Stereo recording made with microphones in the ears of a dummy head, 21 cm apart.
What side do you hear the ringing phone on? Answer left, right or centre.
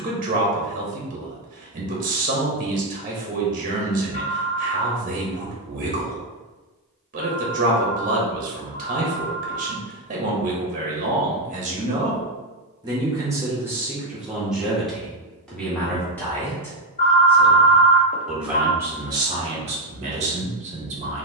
left.